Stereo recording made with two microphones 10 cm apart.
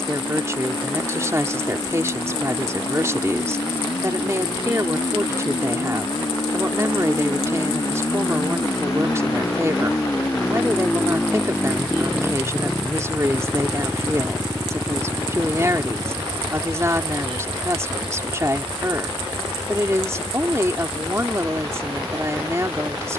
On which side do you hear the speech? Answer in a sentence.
In this clip you hear the speech on the right.